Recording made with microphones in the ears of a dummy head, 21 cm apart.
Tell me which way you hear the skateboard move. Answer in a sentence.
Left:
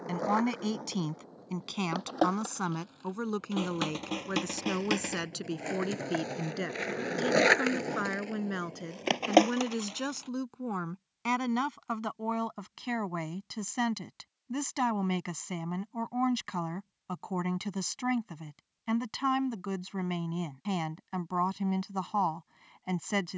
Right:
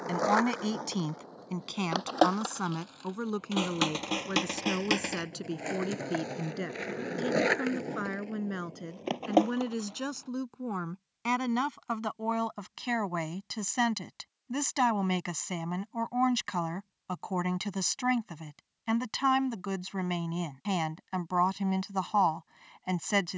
You can hear the skateboard go from the right side to the left.